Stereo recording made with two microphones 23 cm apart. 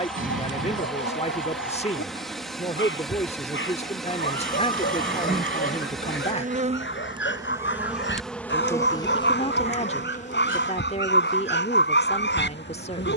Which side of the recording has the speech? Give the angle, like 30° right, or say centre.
30° left.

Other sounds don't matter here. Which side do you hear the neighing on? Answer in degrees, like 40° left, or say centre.
60° right.